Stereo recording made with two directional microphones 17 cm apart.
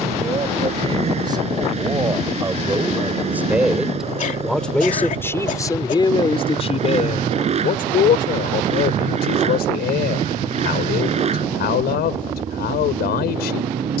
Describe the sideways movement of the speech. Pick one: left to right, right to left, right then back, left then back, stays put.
right to left.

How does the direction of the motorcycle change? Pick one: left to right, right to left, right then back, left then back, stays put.
stays put.